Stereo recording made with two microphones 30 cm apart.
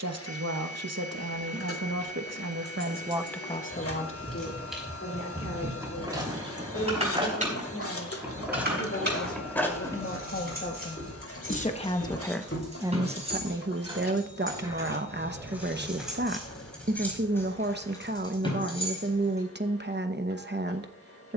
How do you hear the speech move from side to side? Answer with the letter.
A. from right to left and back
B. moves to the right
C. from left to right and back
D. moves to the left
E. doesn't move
A.